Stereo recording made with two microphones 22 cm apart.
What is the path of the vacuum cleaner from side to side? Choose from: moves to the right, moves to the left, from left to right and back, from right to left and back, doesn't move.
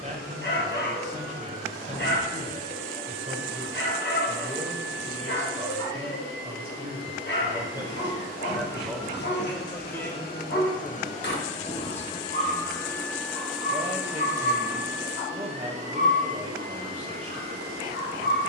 moves to the right.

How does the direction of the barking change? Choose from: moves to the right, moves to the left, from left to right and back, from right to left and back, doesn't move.
doesn't move.